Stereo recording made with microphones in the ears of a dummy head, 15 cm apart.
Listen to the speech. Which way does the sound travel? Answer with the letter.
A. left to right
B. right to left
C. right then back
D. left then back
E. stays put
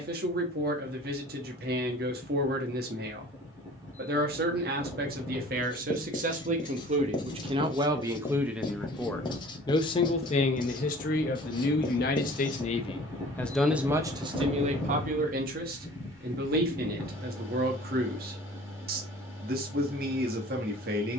D.